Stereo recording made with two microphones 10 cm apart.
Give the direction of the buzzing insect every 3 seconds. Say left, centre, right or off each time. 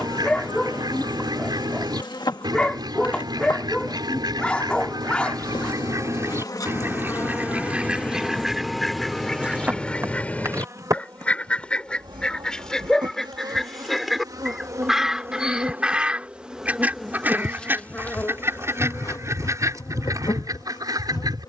left, left, left, right, right, centre, left.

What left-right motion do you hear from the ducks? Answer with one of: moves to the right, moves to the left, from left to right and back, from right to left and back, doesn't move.
from right to left and back.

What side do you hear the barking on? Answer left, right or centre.
centre.